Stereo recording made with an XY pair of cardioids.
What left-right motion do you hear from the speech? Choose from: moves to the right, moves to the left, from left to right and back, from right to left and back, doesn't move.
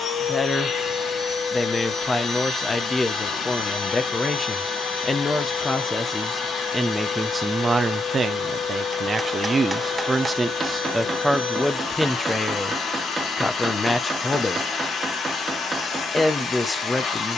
from left to right and back.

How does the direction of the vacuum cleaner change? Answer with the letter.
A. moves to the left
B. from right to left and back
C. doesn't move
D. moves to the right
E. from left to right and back
C.